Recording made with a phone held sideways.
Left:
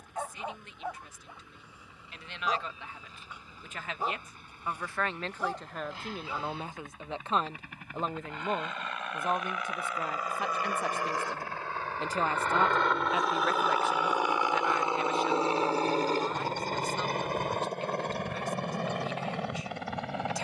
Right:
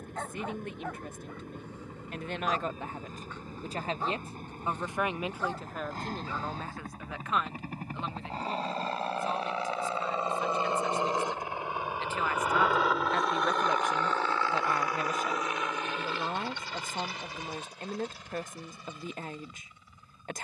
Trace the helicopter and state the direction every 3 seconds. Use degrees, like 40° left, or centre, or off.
50° right, 50° right, 40° right, 30° right, centre, 40° left, 60° left.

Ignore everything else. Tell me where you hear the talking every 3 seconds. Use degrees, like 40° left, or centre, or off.
50° right, 20° right, 30° left, 60° left, centre, 50° right, 50° right.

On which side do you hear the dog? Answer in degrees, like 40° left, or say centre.
10° left.